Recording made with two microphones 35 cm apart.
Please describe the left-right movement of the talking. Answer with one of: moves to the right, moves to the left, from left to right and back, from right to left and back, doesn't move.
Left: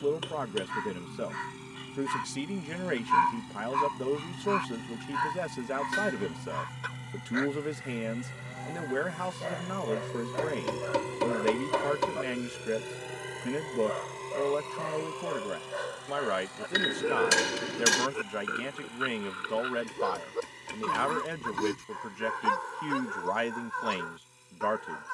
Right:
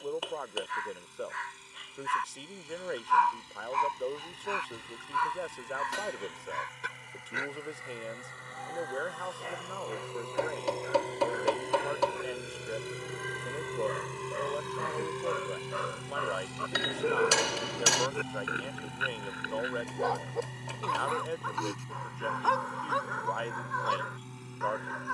doesn't move.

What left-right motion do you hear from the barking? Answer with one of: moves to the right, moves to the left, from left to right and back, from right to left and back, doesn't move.
from left to right and back.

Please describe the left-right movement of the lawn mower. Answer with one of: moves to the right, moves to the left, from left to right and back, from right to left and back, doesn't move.
moves to the right.